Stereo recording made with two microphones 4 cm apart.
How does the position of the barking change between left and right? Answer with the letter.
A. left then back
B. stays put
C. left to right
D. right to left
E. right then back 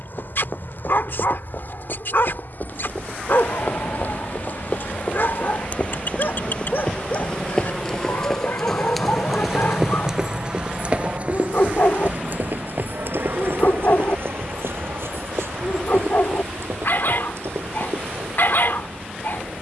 B.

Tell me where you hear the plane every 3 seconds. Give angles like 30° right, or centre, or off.
70° left, 50° left, 30° left, 20° right, 50° right, 70° right, 70° right.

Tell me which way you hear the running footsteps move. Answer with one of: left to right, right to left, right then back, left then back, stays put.
left to right.